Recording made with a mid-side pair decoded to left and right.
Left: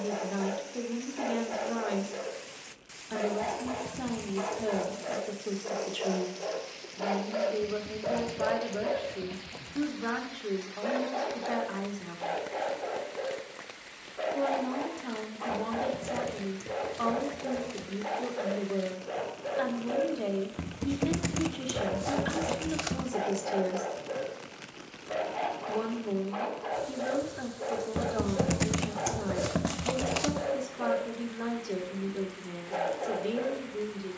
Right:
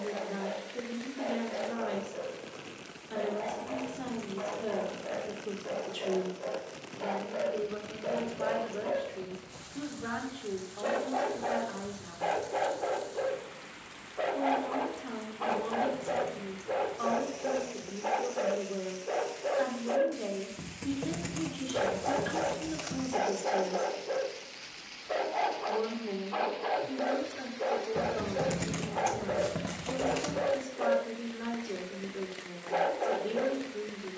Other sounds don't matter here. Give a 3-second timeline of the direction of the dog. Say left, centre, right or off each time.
left, left, left, centre, right, right, right, right, right, right, right, right.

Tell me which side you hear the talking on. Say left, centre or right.
left.